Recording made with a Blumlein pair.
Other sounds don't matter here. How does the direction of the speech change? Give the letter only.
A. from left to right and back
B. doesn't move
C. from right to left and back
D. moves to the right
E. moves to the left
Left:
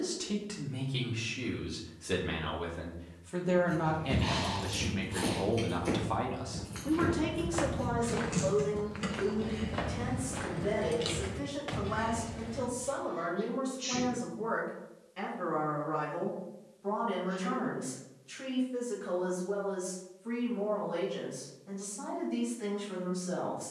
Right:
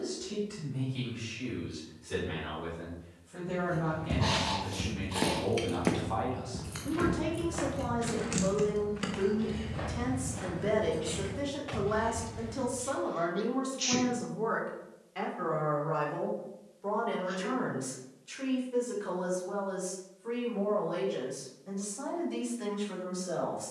D.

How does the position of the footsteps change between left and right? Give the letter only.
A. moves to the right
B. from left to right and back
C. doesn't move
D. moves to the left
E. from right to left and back
D.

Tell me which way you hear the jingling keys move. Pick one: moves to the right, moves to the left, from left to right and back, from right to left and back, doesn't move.
from left to right and back.